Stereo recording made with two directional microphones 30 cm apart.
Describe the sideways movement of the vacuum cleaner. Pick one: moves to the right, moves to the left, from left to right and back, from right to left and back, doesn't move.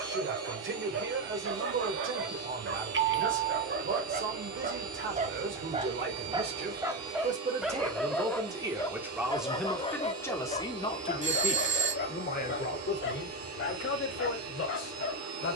doesn't move.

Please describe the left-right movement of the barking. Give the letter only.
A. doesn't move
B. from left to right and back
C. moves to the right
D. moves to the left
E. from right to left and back
D.